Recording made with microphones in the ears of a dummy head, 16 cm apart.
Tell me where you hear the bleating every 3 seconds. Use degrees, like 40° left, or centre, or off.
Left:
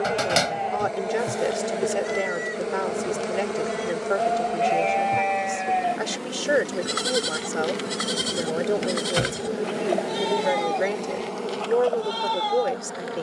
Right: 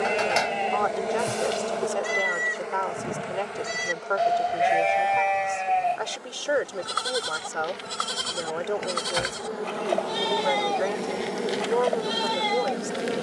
30° right, 10° right, 20° left, centre, 20° right.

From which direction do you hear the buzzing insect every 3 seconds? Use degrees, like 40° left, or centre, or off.
10° left, 60° left, 60° left, 10° left, 30° right.